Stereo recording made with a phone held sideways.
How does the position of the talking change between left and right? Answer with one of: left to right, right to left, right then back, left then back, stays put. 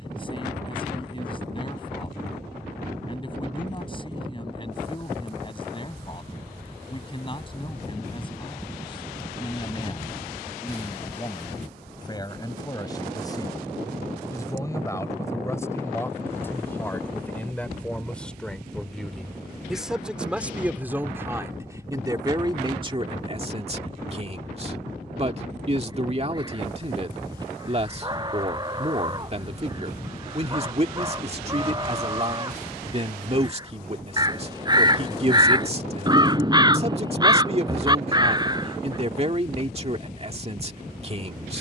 left to right.